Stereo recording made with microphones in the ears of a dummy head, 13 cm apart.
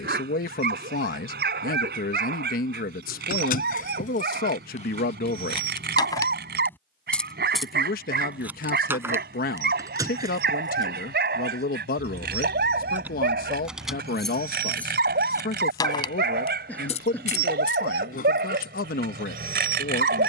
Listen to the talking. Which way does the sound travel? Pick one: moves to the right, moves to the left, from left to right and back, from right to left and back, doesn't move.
doesn't move.